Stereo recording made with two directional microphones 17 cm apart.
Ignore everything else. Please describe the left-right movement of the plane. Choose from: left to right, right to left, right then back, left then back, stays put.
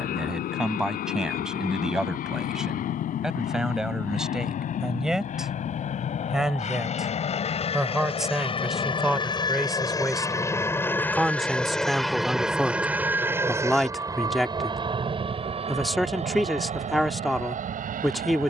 left to right.